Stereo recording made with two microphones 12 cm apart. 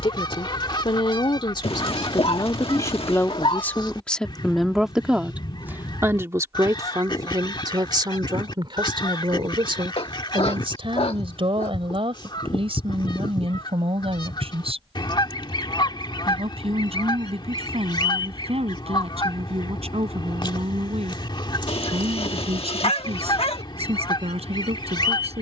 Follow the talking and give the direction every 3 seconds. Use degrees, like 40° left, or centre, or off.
40° left, 10° left, 40° right, 60° right, 60° right, 70° right, 70° right, 70° right, 70° right.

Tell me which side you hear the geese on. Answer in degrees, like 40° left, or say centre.
50° left.